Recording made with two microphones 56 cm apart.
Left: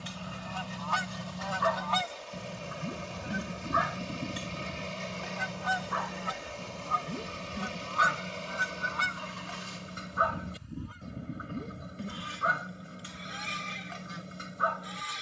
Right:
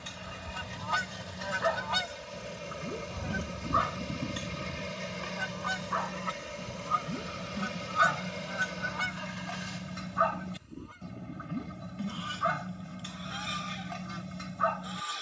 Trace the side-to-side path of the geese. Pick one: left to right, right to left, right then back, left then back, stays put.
right to left.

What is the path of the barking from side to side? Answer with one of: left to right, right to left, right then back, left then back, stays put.
left to right.